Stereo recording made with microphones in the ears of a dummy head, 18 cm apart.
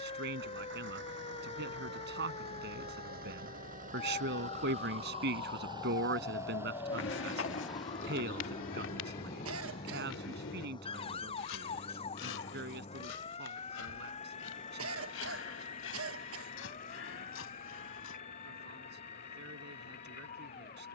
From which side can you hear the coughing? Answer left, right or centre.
right.